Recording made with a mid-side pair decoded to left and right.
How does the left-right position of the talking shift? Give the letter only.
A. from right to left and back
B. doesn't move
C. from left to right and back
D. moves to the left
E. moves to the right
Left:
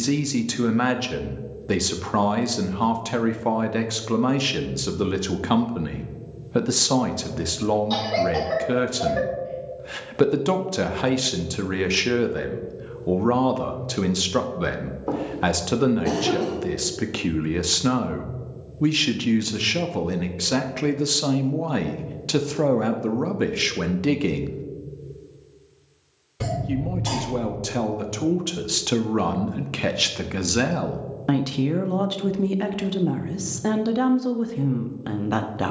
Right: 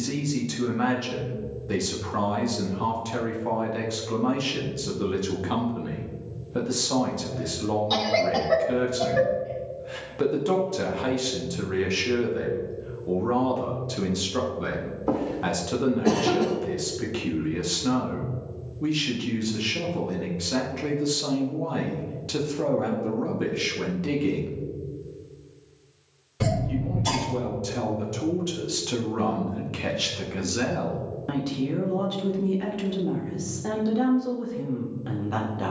B.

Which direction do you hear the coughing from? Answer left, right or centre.
centre.